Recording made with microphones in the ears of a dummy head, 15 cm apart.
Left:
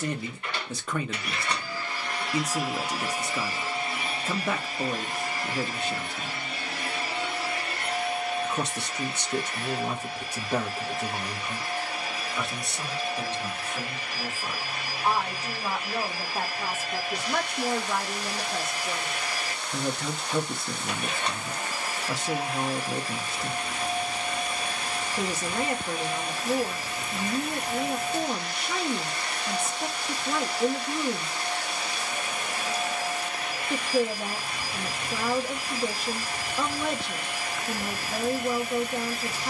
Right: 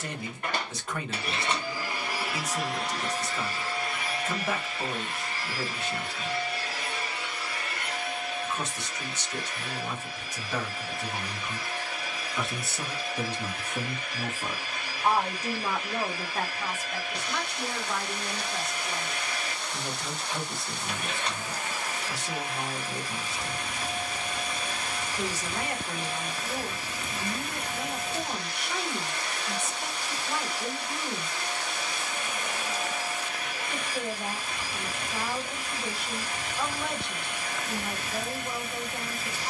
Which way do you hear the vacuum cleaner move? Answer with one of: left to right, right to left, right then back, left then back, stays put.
right to left.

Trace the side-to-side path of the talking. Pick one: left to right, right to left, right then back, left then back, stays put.
right then back.